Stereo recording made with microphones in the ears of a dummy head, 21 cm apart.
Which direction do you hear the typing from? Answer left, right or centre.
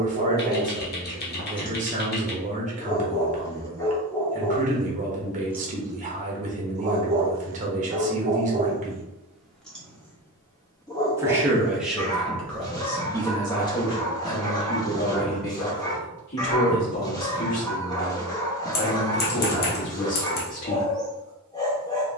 left.